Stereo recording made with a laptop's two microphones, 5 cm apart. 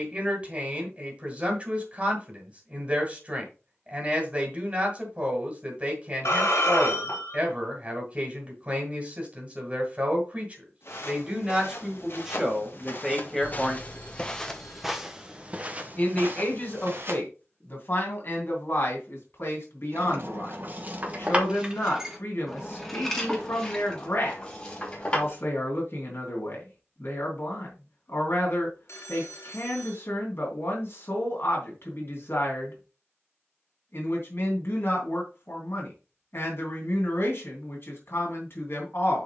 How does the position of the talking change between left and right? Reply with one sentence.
You can hear the talking travel towards the left.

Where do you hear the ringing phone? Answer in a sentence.
In this clip you hear the ringing phone on the left.